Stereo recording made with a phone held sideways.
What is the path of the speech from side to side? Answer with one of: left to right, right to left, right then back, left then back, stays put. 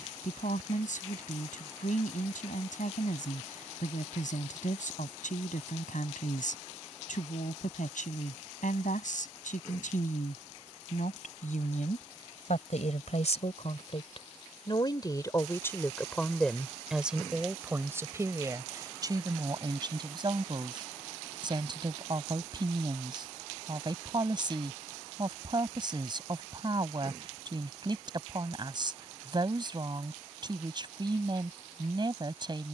left to right.